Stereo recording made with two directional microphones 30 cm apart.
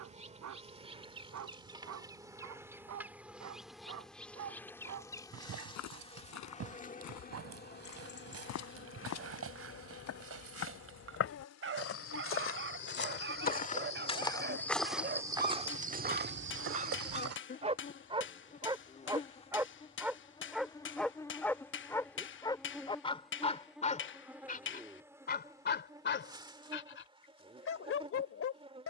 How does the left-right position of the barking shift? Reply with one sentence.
In this clip you hear the barking travel towards the left.